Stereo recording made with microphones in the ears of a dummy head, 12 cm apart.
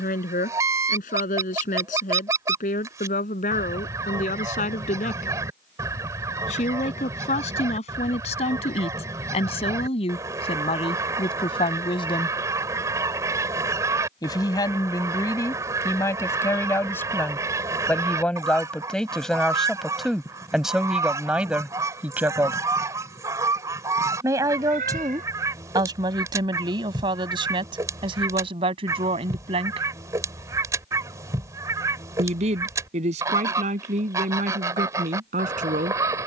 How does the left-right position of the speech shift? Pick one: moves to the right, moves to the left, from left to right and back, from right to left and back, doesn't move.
moves to the right.